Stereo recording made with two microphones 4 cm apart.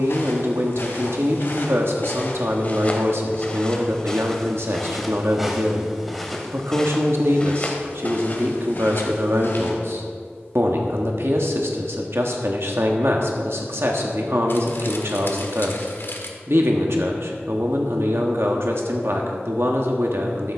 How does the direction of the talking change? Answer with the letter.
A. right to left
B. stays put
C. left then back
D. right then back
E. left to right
B.